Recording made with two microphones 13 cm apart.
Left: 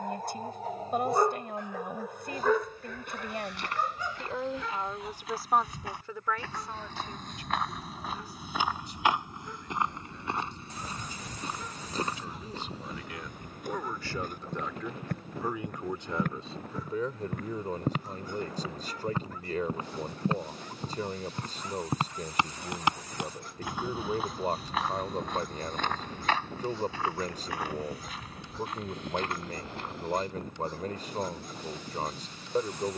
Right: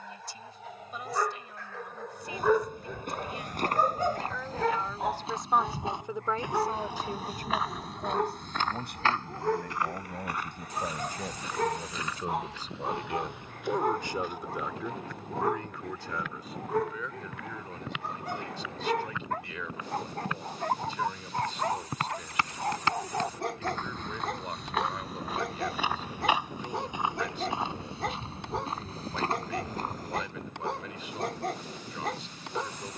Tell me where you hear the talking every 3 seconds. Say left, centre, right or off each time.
left, left, right, right, right, left, left, left, left, left, left.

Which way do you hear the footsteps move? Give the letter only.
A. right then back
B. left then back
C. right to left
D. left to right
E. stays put
B.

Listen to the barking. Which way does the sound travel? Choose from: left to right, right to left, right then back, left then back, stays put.
left to right.